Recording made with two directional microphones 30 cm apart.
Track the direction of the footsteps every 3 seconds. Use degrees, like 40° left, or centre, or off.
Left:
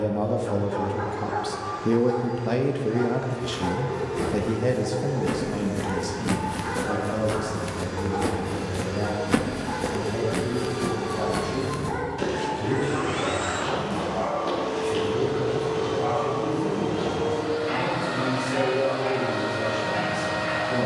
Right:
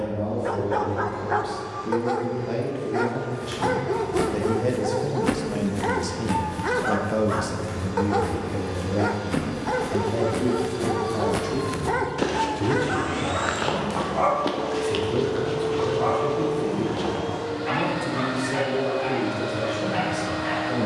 off, 40° right, 50° left, 10° left, 50° right, 60° right, off.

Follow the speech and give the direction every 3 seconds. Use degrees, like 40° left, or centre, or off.
50° left, 10° left, 30° right, 50° right, 60° right, 60° right, 70° right.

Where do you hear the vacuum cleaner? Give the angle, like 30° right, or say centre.
30° left.